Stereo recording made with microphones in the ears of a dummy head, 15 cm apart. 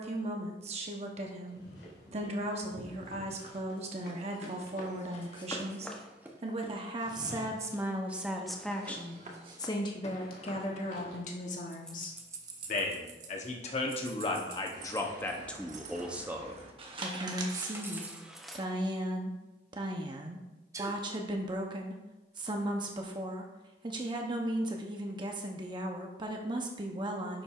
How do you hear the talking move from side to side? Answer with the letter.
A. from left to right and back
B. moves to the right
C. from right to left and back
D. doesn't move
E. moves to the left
C.